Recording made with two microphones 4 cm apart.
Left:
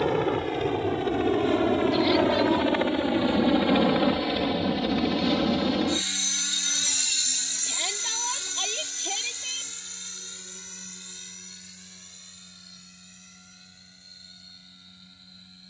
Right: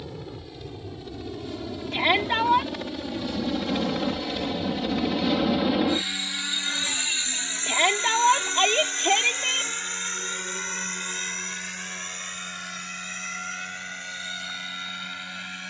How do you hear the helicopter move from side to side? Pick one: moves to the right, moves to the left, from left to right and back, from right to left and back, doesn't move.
moves to the right.